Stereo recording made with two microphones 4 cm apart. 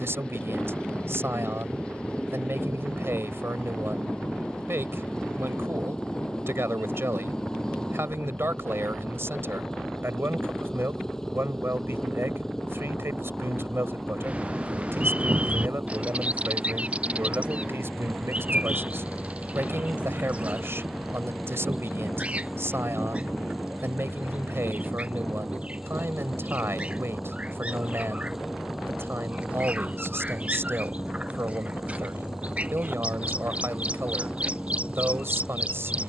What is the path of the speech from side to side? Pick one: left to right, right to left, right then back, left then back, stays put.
stays put.